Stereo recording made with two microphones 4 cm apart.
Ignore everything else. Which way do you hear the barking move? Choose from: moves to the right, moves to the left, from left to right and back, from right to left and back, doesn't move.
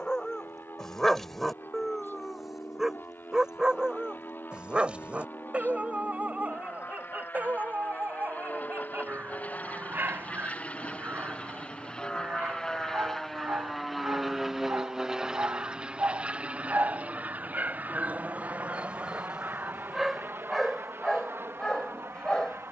from left to right and back.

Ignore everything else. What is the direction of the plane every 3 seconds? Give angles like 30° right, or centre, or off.
70° left, 60° left, 50° left, 40° left, 10° left, 30° right, 50° right, 60° right.